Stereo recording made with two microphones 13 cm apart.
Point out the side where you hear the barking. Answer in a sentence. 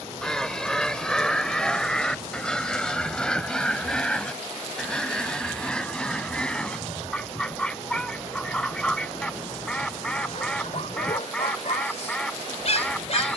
In this clip you hear the barking on the left.